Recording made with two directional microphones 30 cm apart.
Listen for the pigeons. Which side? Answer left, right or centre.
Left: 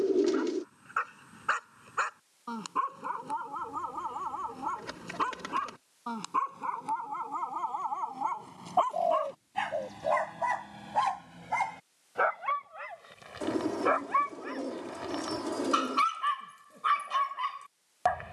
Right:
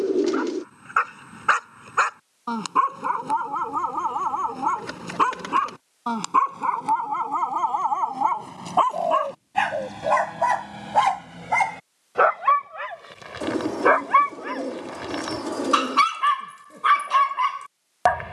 right.